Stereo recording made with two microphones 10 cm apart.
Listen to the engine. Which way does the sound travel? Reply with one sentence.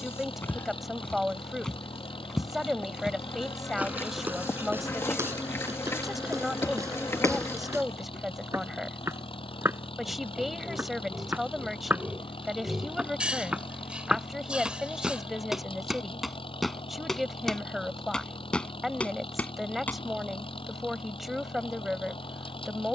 In this clip you hear the engine stay in one place.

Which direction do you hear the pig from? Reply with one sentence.
In this clip you hear the pig in the centre.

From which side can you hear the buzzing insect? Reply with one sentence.
You can hear the buzzing insect on the left.